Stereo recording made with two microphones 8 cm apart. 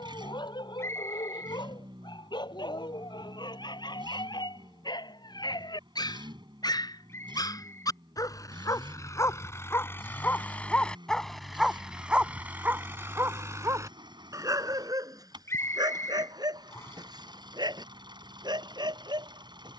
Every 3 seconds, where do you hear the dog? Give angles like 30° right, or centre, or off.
80° left, 70° left, 50° left, 20° left, 30° right, 60° right, 70° right.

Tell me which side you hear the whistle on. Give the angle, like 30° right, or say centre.
40° left.